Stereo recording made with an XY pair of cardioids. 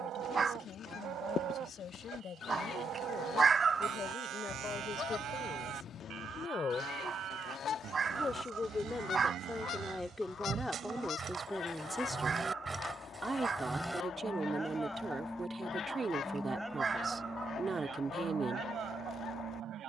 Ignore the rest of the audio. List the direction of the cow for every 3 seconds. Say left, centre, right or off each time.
right, right, right, right, centre, centre, right.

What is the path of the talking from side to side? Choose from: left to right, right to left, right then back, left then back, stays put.
left to right.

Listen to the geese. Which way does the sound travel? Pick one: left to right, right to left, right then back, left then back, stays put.
stays put.